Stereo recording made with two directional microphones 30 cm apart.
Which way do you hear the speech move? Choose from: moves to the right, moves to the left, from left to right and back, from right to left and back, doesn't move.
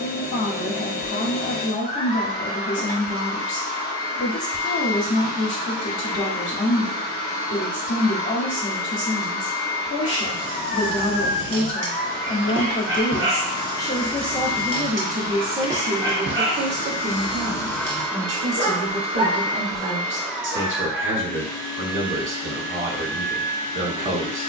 moves to the right.